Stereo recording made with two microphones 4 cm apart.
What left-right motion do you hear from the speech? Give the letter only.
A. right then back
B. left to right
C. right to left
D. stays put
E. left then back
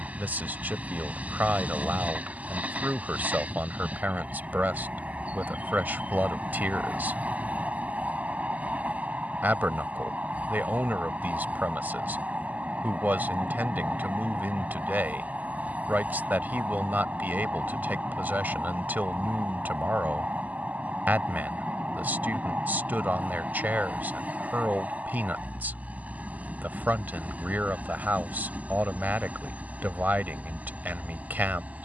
D.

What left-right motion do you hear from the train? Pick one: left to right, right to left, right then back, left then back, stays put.
stays put.